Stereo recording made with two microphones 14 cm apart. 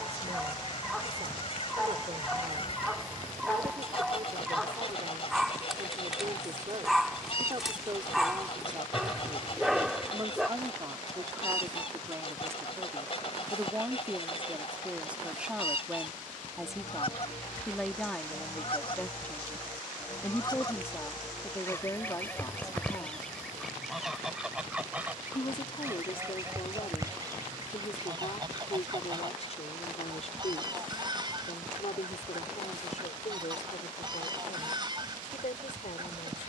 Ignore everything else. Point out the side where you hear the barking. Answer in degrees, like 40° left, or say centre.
centre.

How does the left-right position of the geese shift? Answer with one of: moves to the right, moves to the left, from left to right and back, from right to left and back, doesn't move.
moves to the right.